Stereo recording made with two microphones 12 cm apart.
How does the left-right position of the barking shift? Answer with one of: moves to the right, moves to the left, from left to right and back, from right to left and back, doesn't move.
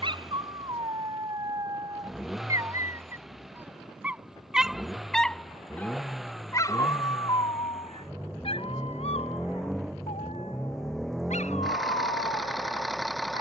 moves to the left.